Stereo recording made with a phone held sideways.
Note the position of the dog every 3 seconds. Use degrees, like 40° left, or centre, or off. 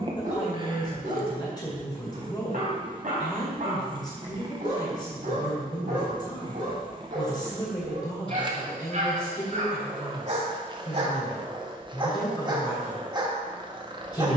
60° right, 60° right, 60° right, 40° right, 30° right.